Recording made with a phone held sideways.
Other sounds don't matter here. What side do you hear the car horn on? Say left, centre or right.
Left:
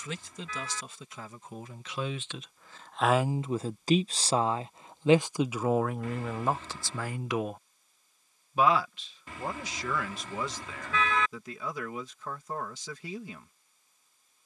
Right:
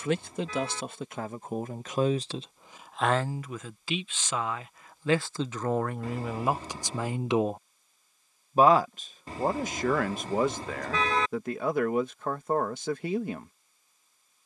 right.